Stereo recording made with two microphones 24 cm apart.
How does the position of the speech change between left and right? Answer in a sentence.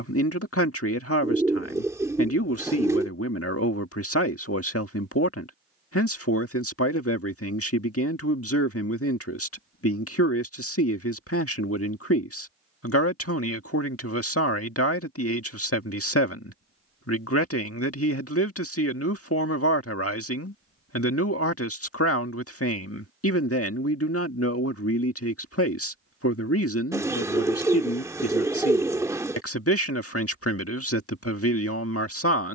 You can hear the speech stay put.